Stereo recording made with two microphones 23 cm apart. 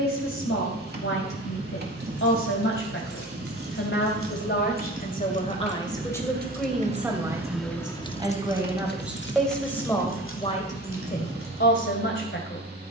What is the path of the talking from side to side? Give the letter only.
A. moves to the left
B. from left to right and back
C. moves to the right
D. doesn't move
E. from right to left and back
B.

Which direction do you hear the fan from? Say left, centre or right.
right.